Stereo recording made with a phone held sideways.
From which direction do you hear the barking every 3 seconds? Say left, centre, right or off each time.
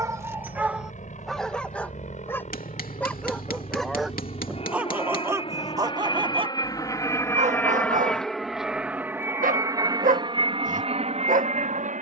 centre, centre, right, right.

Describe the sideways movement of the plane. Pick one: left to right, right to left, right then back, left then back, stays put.
left to right.